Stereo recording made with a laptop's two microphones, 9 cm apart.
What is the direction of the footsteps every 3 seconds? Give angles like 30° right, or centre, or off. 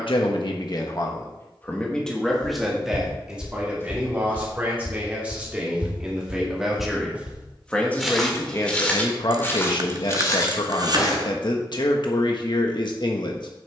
50° left, 20° left, 10° right, 40° left, off.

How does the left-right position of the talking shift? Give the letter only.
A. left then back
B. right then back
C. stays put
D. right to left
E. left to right
B.